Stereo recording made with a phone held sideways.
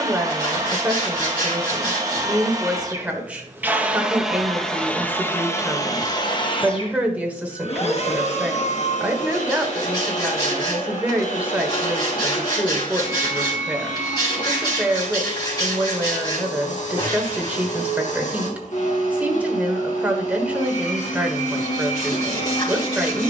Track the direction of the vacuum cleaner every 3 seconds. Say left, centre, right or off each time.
right, centre, left, left, left, left, left, left.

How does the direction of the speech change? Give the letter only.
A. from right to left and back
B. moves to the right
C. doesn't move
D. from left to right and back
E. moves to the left
C.